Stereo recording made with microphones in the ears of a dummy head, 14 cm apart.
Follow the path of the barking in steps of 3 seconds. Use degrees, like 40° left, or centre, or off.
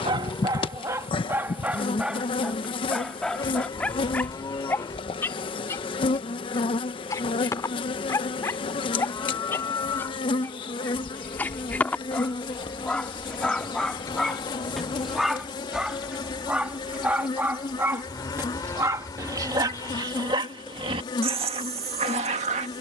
10° right, 10° left, 20° left, 10° left, centre, 10° right, 20° right, 40° right.